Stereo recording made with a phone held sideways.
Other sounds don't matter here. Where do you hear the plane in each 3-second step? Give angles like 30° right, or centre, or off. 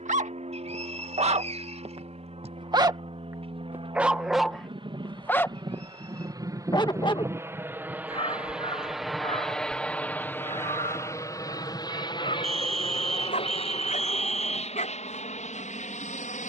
50° right, 40° right, 20° right, 20° left, 40° left, 50° left.